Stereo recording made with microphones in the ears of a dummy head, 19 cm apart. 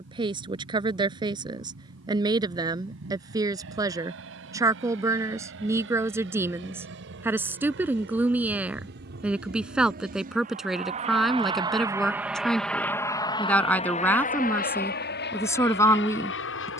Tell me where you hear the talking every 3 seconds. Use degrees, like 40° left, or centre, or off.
20° right, 20° right, 10° right, centre, 10° left, 10° left.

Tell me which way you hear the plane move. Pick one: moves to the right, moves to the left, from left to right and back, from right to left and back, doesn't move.
moves to the left.